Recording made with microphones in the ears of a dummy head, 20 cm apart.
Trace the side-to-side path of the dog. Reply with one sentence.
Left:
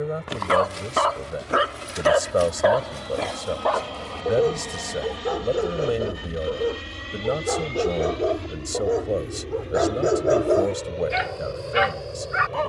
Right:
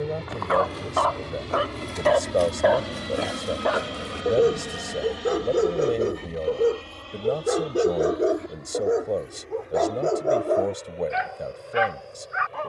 You can hear the dog move from left to right and back again.